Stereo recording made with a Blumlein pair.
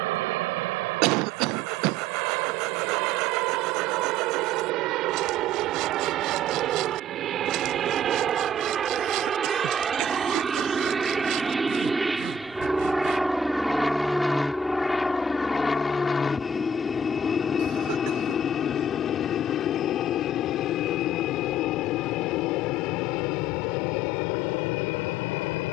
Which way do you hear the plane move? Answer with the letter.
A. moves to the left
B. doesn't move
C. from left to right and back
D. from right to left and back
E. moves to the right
A.